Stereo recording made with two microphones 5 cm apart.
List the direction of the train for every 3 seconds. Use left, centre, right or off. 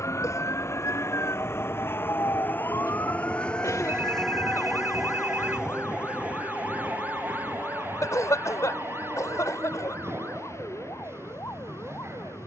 left, centre, right, right.